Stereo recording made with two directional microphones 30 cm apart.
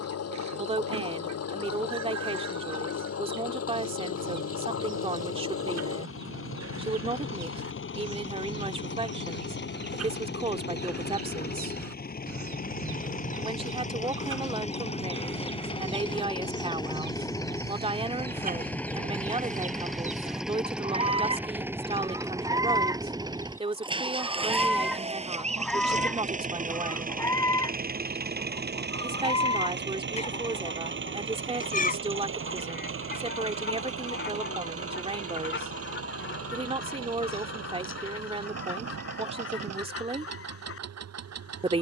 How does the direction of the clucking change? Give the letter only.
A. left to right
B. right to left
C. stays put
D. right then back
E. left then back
B.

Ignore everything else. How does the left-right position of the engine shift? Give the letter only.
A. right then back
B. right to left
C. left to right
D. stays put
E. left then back
C.